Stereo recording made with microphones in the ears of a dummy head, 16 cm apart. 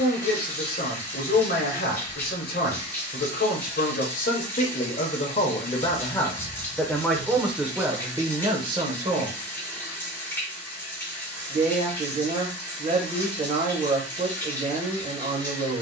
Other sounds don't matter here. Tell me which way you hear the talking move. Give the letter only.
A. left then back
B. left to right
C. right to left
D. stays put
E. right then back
B.